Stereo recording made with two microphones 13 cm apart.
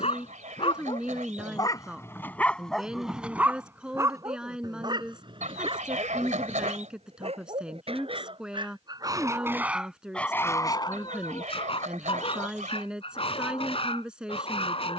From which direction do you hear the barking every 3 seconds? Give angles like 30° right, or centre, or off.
30° left, 30° right, 50° right, 20° left, 50° left.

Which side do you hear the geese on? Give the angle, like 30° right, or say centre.
70° right.